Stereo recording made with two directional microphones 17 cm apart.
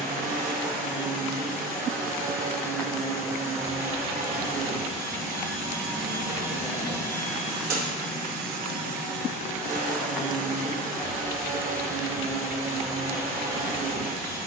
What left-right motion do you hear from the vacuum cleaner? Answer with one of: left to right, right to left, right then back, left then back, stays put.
stays put.